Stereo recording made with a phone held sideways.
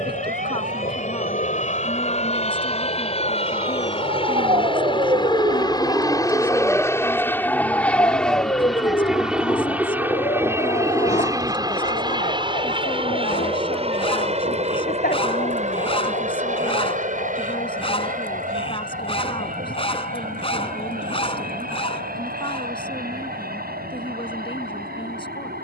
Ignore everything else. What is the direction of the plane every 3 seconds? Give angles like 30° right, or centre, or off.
50° left, 40° left, 10° left, 10° right, 40° right, 50° right, 60° right, 60° right, 70° right.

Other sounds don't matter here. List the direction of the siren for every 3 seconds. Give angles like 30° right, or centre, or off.
70° right, 40° right, 10° left, 40° left, 60° left, 60° left, 70° left, 70° left, 70° left.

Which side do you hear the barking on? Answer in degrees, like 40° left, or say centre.
40° left.